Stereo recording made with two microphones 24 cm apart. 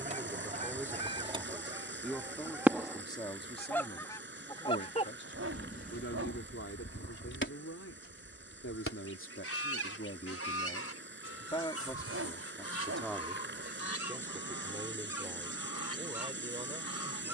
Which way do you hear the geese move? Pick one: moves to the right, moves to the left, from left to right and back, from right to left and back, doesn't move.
moves to the left.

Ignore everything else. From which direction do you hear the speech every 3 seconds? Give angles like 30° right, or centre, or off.
centre, 40° left, 70° left, 40° left, centre, 20° right.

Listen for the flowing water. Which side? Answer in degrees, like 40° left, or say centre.
50° right.